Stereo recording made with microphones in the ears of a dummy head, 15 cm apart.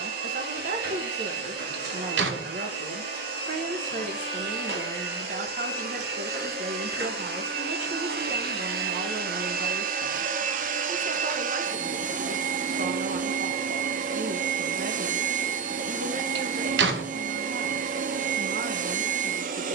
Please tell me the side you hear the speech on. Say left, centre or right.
right.